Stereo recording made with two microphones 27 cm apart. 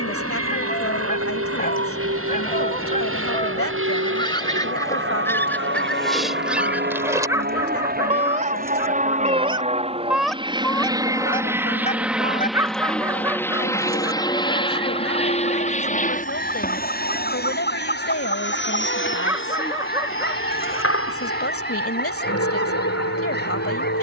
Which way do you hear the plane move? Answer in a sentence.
In this clip you hear the plane travel towards the left.